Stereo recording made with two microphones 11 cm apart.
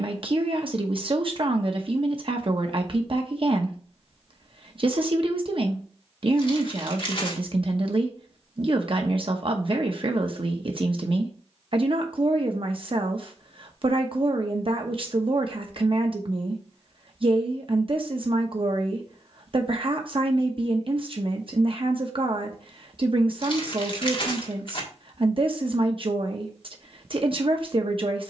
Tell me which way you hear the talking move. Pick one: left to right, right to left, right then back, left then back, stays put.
stays put.